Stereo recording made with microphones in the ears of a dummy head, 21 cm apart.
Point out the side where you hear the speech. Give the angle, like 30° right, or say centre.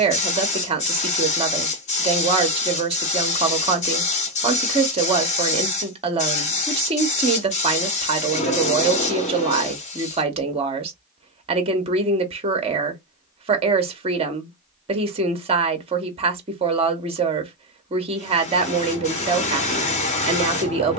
30° right.